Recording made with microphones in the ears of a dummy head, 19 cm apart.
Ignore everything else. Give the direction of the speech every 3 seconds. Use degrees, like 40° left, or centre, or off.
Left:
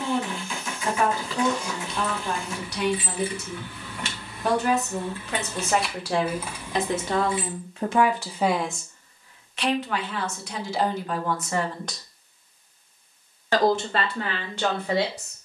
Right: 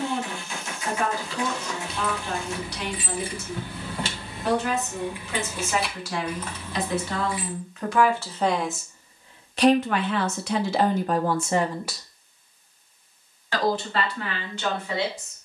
50° left, 50° left, 30° left, 40° right, 50° left.